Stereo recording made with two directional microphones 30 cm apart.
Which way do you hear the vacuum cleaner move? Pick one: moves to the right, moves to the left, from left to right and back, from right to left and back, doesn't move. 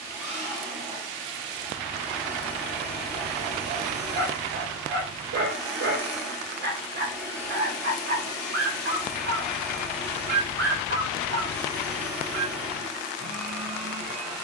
doesn't move.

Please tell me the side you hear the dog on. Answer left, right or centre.
right.